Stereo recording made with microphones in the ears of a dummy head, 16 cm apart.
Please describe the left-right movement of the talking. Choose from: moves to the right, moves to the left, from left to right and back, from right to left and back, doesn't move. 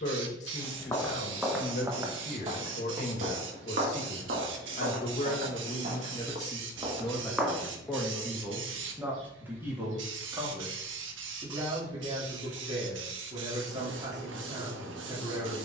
moves to the right.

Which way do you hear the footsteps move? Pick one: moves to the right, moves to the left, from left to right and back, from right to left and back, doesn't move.
from left to right and back.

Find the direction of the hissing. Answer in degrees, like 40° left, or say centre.
80° right.